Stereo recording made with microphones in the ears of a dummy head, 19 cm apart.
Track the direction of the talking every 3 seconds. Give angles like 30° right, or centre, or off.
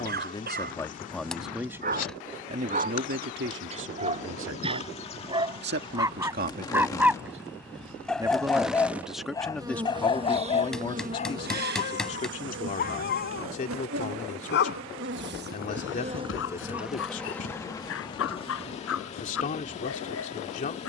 centre, 60° right, 30° right, 10° left, 40° left, 40° left, 40° left.